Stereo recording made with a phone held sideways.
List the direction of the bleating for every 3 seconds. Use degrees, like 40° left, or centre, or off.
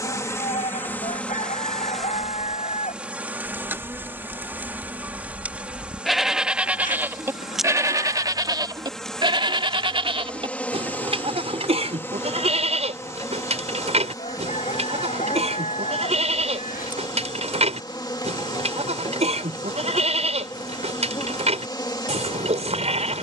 60° left, 10° left, 20° right, 40° right, 50° right, 50° right, 50° right, 50° right.